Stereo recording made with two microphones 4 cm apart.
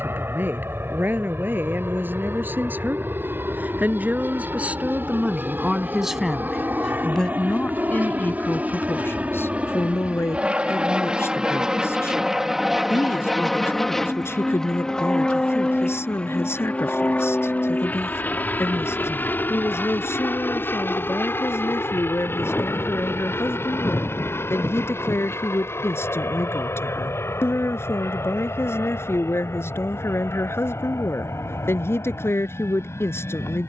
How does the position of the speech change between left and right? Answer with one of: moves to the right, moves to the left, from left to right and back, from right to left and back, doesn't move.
moves to the left.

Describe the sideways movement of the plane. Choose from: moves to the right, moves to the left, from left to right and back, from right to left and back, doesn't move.
moves to the left.